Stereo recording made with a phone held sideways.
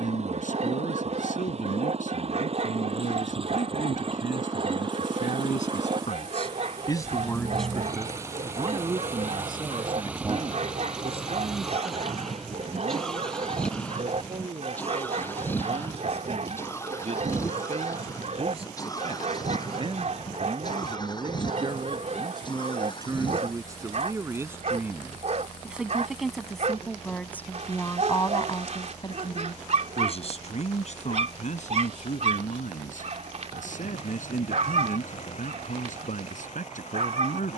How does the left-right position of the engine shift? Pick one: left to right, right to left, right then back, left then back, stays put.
right to left.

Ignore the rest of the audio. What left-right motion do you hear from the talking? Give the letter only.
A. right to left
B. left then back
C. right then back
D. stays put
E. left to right
C.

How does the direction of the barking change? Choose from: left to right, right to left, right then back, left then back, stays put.
stays put.